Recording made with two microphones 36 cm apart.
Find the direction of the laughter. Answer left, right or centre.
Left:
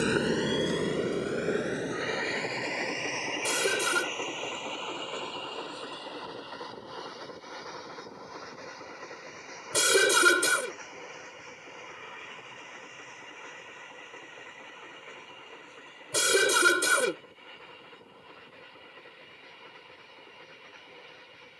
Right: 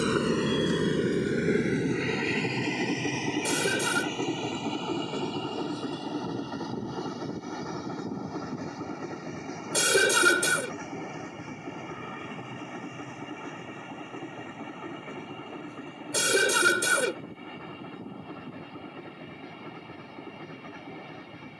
centre.